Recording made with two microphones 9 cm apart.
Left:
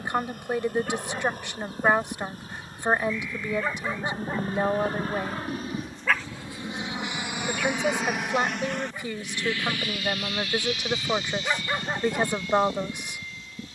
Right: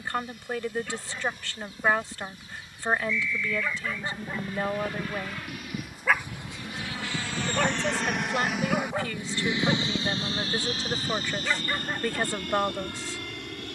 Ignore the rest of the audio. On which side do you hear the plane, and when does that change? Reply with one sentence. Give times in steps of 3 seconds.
You can hear the plane on the left from 0 s, in the centre from 6 s and on the right from 9 s.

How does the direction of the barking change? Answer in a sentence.
You can hear the barking go right and come back.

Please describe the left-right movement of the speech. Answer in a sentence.
In this clip you hear the speech stay in one place.